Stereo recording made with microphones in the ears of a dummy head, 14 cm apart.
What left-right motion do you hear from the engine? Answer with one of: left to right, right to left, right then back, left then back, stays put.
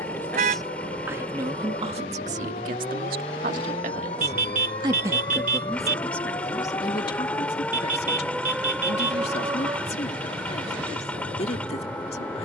stays put.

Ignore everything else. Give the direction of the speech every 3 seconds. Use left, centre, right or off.
right, right, left, left.